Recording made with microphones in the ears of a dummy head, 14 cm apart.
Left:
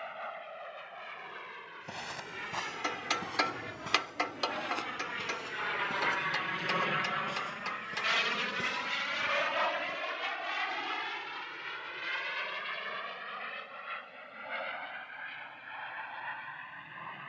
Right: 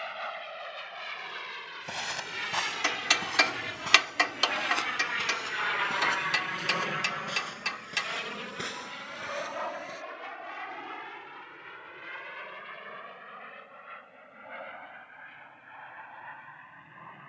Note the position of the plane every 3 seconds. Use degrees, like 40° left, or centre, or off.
70° right, 50° right, 20° left, 60° left, 70° left, 80° left.